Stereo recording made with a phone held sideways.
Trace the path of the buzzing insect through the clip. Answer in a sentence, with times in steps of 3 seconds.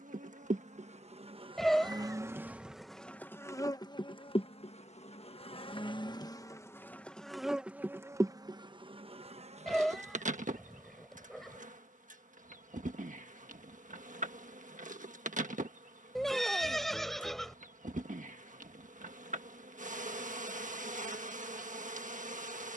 In this clip you hear the buzzing insect on the right from 0 s, on the left from 3 s, in the centre from 6 s and on the right from 9 s.